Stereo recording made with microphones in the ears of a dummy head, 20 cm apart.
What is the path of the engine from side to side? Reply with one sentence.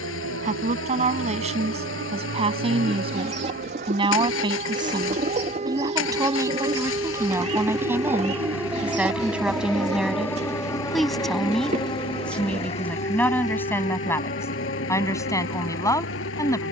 In this clip you hear the engine stay in one place.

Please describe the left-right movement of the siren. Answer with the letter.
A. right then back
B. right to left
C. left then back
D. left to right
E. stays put
B.